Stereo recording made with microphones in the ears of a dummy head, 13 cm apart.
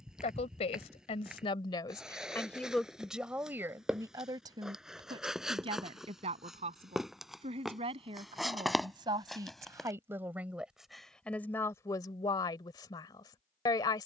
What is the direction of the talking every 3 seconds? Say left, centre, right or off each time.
left, right, right, centre, left.